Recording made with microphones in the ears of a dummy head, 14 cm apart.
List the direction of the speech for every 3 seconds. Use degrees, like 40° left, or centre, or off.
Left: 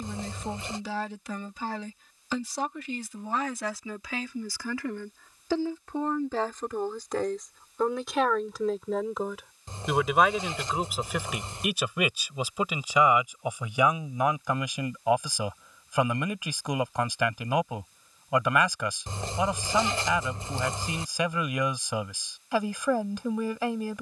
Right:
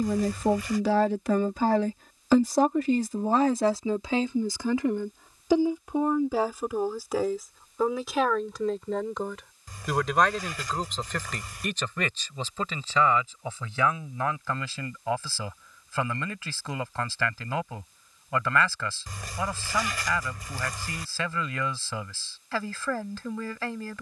40° right, 20° right, centre, 10° left, 10° left, 10° left, 10° left, 10° left.